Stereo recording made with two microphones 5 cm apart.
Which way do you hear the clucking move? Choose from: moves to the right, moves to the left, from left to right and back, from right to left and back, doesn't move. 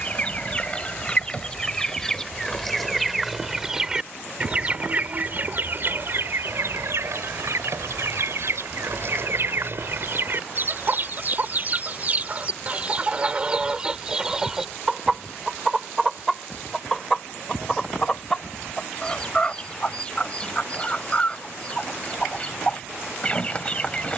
from left to right and back.